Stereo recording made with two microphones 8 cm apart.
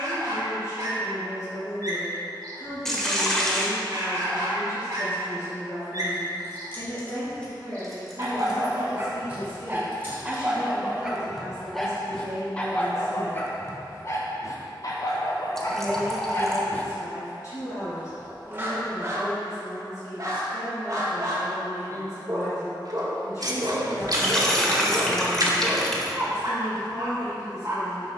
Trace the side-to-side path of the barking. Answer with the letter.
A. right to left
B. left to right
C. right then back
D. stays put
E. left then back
E.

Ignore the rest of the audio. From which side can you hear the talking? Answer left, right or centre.
left.